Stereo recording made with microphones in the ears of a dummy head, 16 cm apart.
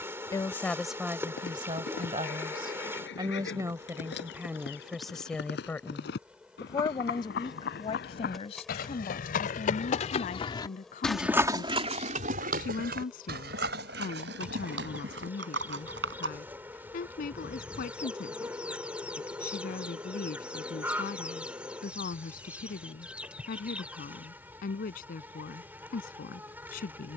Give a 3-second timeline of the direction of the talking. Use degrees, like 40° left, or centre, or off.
20° right, 10° right, 30° left, 50° left, 60° left, 60° left, 60° left, 60° left, 60° left.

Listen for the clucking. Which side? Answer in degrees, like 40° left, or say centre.
10° right.